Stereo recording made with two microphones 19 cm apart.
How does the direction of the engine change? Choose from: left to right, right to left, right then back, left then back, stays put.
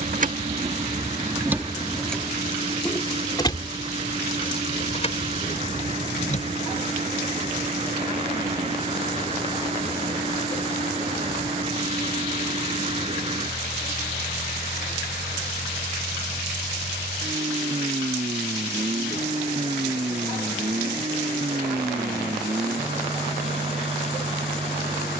stays put.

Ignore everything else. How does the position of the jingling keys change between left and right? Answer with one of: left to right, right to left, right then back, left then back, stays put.
right to left.